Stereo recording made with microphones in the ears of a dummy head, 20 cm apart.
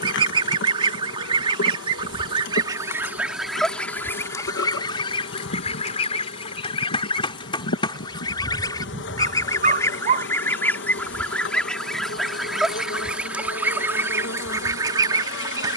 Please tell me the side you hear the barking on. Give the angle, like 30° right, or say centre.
40° right.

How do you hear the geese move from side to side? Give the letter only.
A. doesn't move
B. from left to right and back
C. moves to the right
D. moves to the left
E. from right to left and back
E.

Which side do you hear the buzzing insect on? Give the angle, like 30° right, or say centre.
60° left.